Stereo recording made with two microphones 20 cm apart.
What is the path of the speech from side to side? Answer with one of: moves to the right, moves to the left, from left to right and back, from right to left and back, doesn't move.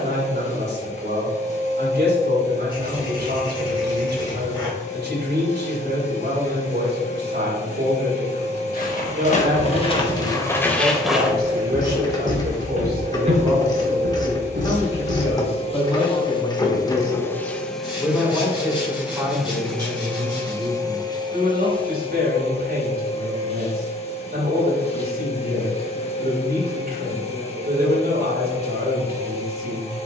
from right to left and back.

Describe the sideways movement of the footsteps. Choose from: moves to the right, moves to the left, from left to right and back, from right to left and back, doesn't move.
moves to the right.